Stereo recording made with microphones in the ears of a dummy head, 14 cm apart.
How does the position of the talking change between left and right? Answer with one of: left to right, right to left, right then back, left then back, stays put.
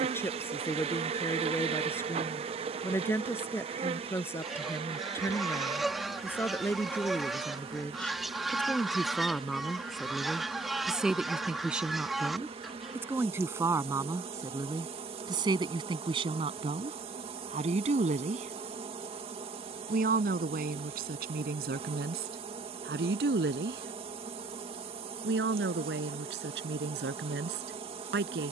left to right.